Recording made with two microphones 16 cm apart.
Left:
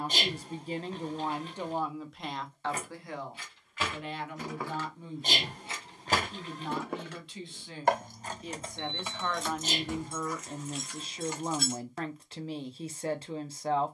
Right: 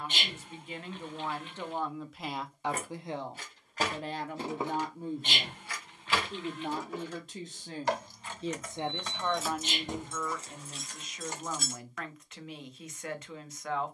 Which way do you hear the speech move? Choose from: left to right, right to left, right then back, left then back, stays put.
right then back.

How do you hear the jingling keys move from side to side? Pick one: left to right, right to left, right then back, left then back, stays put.
left then back.